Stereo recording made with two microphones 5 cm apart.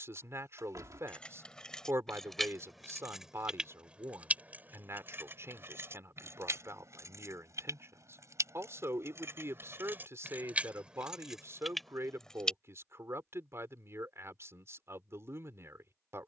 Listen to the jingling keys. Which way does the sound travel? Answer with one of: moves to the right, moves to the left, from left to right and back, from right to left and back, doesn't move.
from left to right and back.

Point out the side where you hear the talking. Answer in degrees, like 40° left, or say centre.
50° right.